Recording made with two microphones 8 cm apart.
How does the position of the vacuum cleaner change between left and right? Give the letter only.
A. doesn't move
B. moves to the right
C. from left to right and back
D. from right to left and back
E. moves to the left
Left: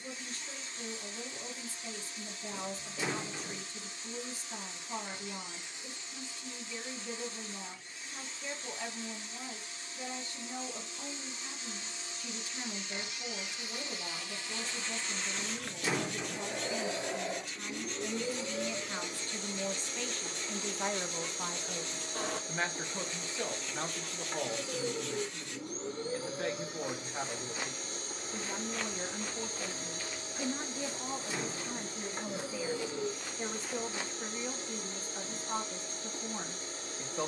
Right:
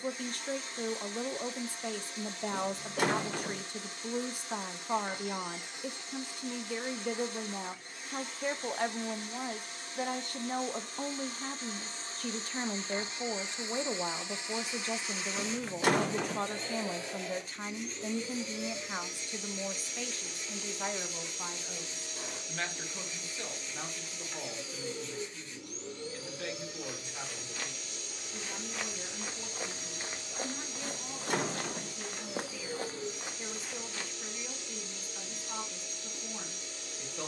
E.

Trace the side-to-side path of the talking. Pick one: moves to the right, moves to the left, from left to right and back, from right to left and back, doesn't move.
moves to the left.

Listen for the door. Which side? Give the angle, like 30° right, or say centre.
60° right.